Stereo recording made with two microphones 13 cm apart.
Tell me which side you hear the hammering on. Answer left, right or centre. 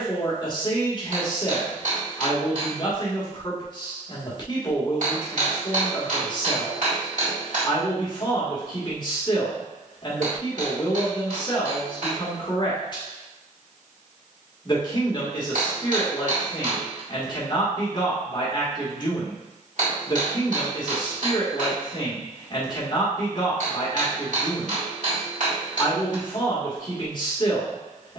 right.